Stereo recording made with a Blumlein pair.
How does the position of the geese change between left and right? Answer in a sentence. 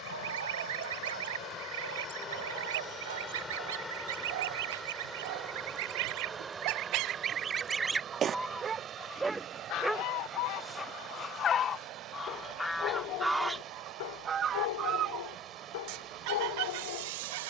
You can hear the geese go left and come back.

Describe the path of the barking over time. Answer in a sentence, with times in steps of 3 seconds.
You can hear the barking on the right from 0 s, in the centre from 9 s and on the left from 12 s.